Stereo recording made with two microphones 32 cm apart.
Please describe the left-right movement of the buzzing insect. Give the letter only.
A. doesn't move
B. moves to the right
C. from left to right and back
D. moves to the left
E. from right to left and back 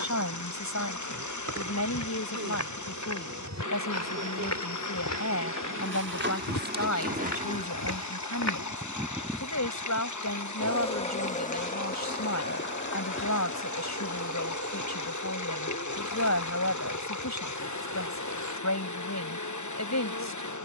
D.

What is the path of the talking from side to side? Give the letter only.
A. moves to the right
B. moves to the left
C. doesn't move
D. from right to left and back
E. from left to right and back
C.